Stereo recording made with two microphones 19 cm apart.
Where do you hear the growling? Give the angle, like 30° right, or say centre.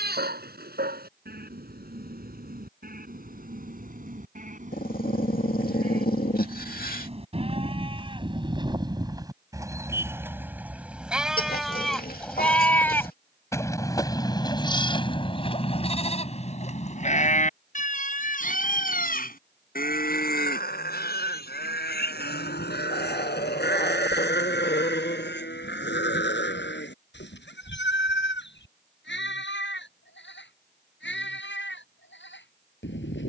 50° left.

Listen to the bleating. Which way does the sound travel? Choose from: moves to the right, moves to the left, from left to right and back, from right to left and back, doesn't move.
moves to the left.